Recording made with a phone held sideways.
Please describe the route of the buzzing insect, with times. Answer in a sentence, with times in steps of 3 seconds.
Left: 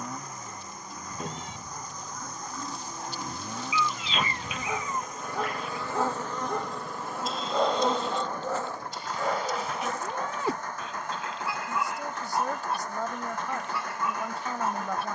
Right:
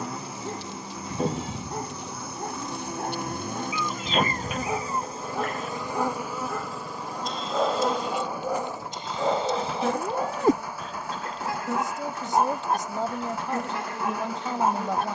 You can hear the buzzing insect on the right from 0 s, in the centre from 6 s and on the right from 9 s.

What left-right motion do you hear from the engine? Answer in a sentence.
You can hear the engine stay in one place.